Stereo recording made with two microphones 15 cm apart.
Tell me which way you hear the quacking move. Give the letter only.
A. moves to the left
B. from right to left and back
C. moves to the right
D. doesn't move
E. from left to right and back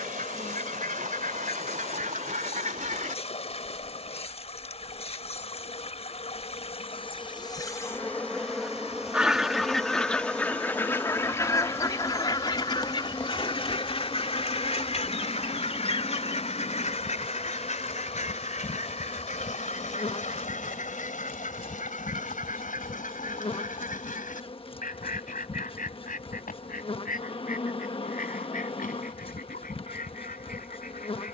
A.